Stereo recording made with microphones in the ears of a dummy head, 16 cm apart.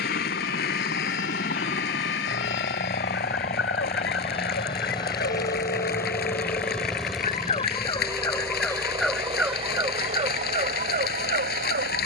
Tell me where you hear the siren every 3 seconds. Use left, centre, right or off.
left, left, left, right.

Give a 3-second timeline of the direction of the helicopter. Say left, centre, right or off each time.
left, left, centre, right.